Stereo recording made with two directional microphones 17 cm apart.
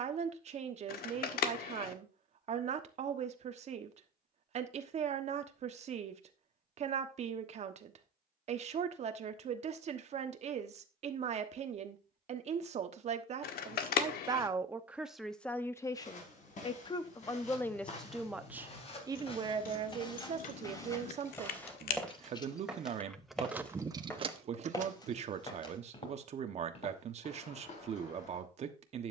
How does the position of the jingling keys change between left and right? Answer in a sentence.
You can hear the jingling keys move to the right.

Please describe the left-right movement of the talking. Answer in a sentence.
In this clip you hear the talking go left and come back.